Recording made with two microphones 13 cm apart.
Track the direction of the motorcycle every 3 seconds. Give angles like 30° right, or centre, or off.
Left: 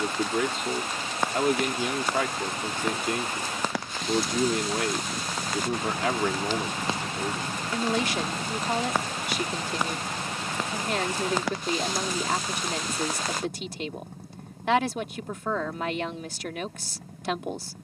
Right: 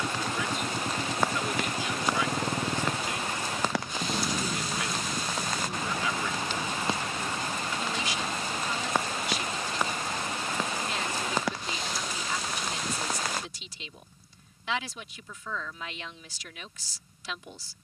50° right, centre, 30° left, 50° left, 60° left, 70° left.